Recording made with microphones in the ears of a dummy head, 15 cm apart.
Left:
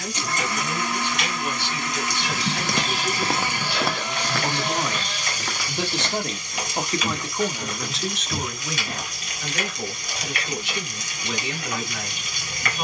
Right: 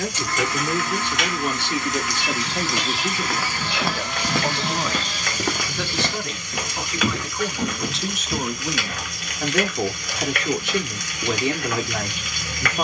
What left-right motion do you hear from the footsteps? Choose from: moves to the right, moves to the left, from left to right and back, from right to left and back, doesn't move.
from left to right and back.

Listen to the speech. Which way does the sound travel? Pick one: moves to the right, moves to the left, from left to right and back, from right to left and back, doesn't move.
from right to left and back.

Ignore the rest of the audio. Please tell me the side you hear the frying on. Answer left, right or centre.
right.